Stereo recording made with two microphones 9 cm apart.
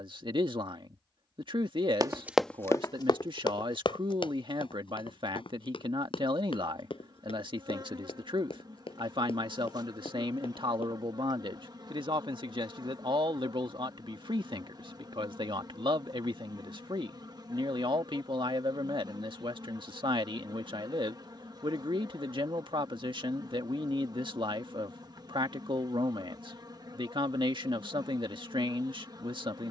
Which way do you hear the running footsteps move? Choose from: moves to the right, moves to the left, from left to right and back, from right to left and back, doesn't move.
moves to the left.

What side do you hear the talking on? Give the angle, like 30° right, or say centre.
70° right.